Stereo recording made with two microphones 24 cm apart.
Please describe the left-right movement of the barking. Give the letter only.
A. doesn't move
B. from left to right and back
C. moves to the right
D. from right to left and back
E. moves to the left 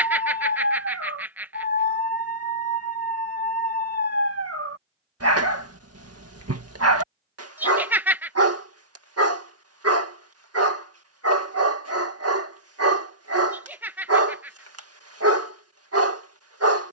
A.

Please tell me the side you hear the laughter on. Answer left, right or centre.
centre.